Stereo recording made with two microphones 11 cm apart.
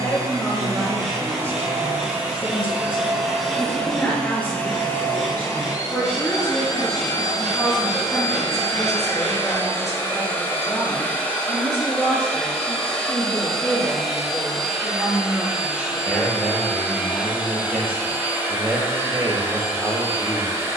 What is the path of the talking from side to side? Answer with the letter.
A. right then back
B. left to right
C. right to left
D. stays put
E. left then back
B.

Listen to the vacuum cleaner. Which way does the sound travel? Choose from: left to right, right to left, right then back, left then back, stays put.
left then back.